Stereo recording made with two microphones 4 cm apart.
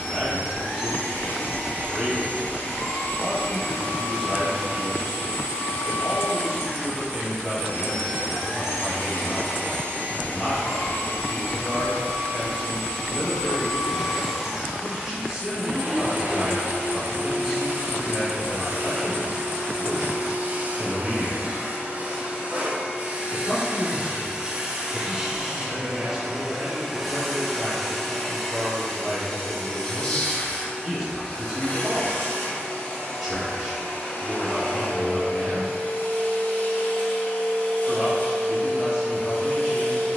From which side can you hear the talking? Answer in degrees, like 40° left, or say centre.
centre.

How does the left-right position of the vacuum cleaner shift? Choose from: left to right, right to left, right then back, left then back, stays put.
right then back.